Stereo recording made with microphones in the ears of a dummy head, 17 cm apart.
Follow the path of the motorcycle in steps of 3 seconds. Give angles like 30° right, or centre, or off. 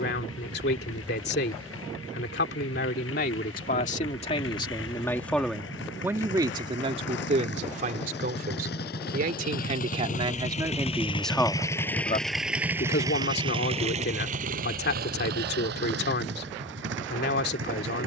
80° left, 70° left, 60° left, 40° left, 20° right, 60° right.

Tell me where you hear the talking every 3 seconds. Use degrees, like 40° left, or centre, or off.
60° left, 30° left, 30° right, 20° right, 50° left, 60° left.